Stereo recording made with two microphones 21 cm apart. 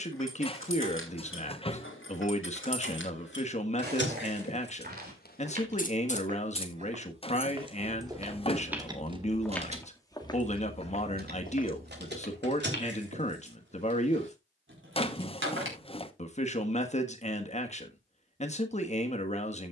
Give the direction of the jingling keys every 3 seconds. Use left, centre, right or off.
left, left, centre, right, right, right, off.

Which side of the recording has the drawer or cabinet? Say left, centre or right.
left.